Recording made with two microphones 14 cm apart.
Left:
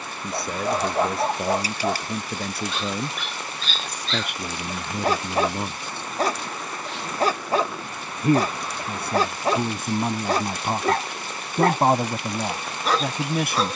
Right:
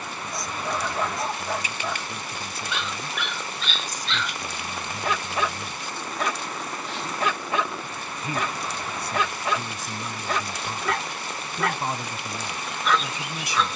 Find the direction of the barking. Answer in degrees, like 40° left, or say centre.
40° left.